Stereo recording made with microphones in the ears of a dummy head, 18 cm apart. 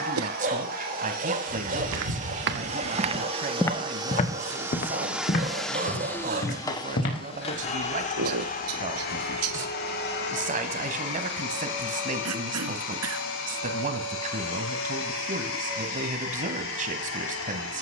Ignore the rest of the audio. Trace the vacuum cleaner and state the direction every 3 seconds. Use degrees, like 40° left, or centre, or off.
50° right, 10° right, 30° left, 60° left, 70° left, 80° left.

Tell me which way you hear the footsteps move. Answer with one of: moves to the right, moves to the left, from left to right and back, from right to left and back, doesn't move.
moves to the left.